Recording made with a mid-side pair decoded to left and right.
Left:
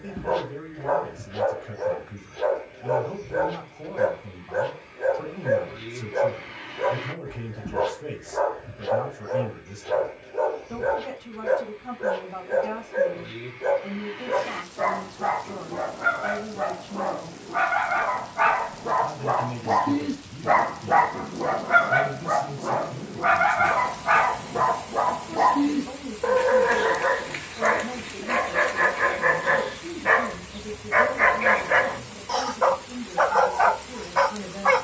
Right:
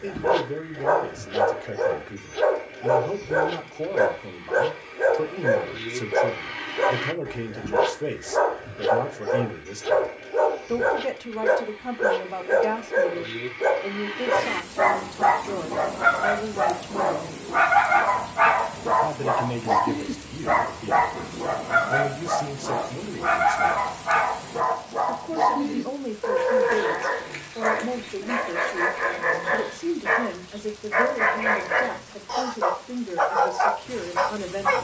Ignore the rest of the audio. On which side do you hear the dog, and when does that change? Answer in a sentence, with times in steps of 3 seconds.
In this clip you hear the dog on the right from 0 s, in the centre from 18 s and on the left from 21 s.